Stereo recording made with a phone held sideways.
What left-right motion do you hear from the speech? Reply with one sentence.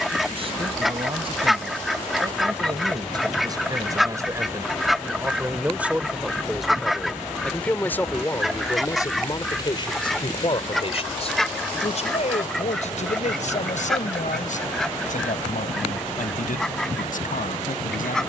In this clip you hear the speech move from right to left.